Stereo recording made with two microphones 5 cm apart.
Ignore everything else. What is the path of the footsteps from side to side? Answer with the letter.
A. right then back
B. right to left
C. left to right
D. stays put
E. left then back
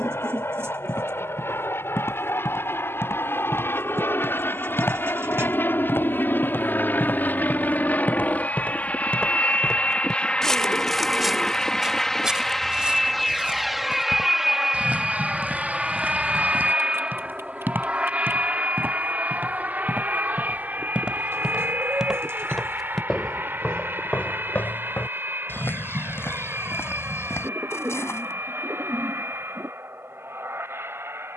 A.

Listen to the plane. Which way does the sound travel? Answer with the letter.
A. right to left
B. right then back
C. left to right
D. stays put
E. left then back
C.